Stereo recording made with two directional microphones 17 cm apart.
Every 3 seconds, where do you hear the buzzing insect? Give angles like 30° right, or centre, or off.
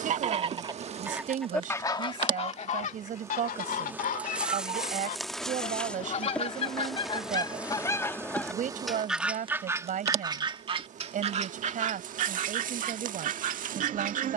30° right, 10° right, 10° right, 40° right, 50° right.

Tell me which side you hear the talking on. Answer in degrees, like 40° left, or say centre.
50° right.